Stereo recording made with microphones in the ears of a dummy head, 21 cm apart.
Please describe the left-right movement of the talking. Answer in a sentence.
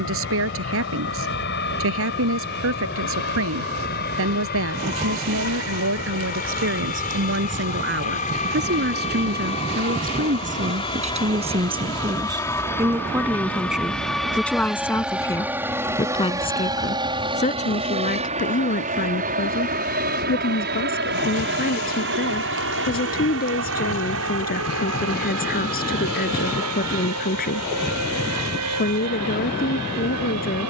In this clip you hear the talking go from the right side to the left.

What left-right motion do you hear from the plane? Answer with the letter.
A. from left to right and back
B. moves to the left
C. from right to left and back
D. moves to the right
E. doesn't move
D.